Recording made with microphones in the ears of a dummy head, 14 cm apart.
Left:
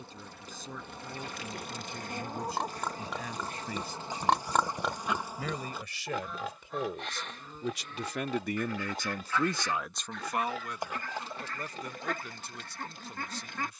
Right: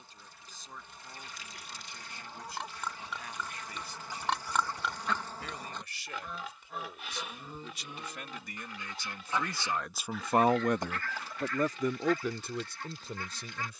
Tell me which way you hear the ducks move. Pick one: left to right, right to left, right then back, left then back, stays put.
right then back.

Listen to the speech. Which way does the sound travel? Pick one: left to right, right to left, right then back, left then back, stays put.
left to right.